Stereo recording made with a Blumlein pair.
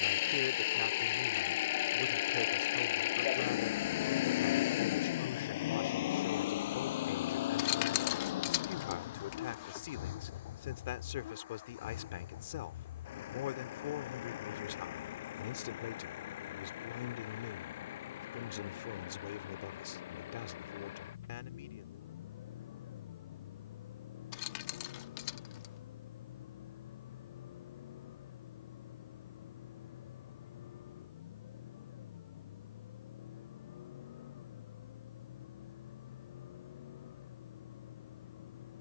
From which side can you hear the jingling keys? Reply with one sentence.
In this clip you hear the jingling keys on the left.